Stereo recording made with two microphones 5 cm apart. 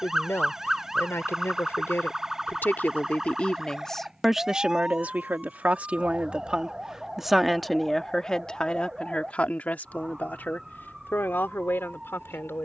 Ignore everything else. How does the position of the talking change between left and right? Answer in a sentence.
You can hear the talking move from left to right and back again.